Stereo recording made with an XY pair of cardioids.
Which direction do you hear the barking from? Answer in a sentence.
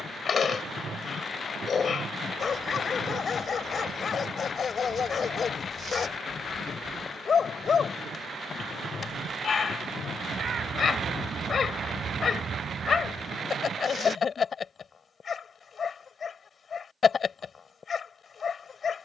You can hear the barking on the left.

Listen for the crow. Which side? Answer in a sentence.
In this clip you hear the crow on the right.